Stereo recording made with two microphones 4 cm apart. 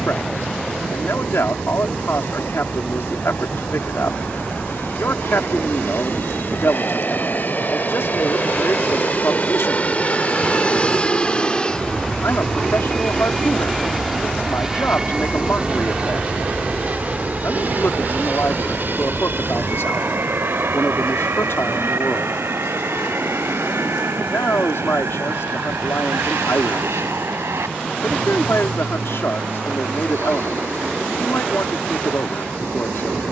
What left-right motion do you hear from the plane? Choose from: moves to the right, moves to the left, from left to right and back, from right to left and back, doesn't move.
moves to the right.